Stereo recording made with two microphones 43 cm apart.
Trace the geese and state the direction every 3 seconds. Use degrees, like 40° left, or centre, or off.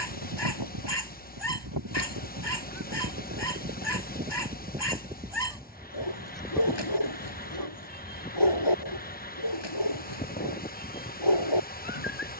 50° right, 20° right, 10° left, 20° left.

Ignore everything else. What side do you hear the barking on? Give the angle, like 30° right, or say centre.
70° left.